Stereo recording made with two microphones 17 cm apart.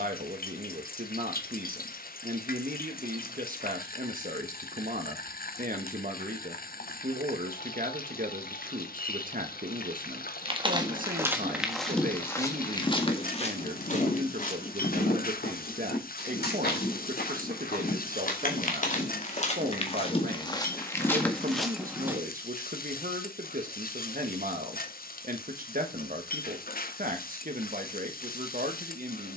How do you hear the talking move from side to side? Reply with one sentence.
You can hear the talking stay in one place.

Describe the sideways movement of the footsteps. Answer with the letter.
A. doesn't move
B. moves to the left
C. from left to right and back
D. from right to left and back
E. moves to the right
D.